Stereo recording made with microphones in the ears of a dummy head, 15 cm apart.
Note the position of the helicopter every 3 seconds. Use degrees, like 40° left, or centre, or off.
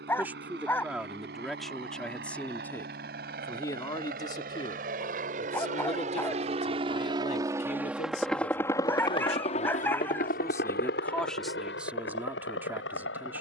70° right, 60° right, 20° right, 50° left, 70° left.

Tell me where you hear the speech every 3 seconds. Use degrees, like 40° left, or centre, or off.
centre, 30° left, 50° left, 20° left, 10° right.